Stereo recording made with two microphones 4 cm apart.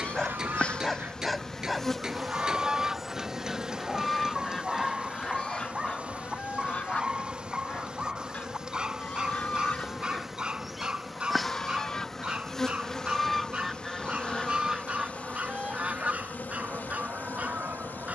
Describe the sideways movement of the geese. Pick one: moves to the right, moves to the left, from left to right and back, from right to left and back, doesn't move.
from right to left and back.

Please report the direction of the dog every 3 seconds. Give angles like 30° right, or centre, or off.
centre, 10° right, 20° right, 30° right, 30° right, 40° right.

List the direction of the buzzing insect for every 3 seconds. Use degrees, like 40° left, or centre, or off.
10° left, 30° right, 30° right, 10° right, 20° left, 40° left.